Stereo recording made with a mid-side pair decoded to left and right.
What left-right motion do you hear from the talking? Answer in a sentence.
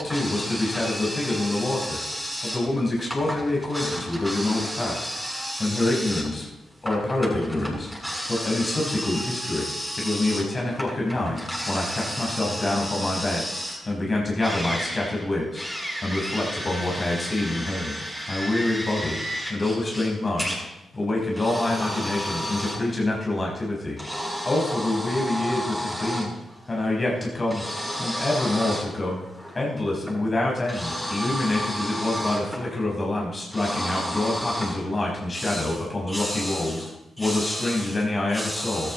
In this clip you hear the talking stay put.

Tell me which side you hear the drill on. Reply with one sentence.
You can hear the drill in the centre.